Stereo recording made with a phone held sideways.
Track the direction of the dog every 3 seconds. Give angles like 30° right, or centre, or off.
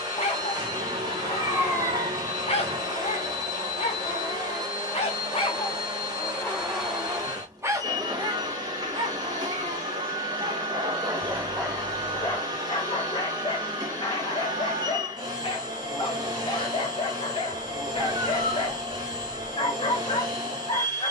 50° left, 40° left, 10° right, 30° right, 40° left, 40° left, 40° left.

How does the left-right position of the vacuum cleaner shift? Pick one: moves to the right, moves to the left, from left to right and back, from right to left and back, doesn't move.
doesn't move.